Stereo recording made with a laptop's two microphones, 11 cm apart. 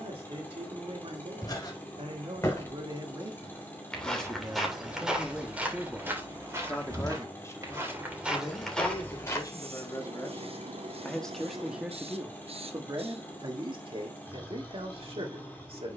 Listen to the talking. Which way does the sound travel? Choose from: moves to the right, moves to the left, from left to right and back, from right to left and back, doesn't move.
from right to left and back.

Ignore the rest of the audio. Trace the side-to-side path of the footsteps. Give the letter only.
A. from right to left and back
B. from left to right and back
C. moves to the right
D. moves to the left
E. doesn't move
B.